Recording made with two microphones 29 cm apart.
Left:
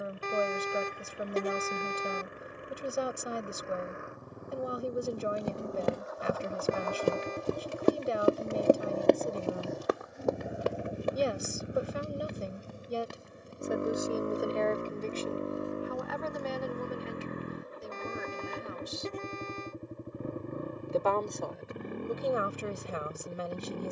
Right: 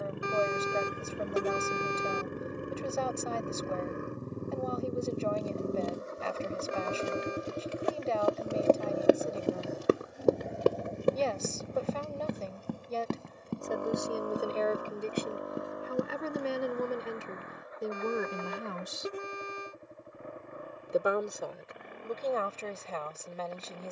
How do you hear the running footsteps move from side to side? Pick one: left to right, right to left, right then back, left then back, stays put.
left to right.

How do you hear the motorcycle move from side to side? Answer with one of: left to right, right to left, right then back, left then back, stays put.
right to left.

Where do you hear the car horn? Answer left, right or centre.
centre.